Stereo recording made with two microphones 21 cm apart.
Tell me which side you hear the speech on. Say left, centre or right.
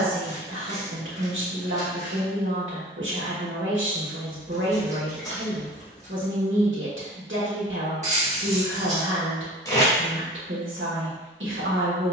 right.